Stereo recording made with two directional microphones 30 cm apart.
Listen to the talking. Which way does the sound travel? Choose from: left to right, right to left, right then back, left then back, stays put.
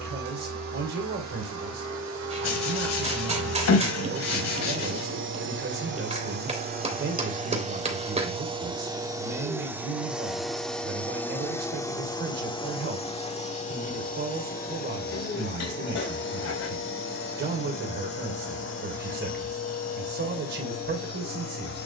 stays put.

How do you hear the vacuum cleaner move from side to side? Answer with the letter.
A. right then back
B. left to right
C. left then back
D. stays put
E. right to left
E.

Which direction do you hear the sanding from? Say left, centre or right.
left.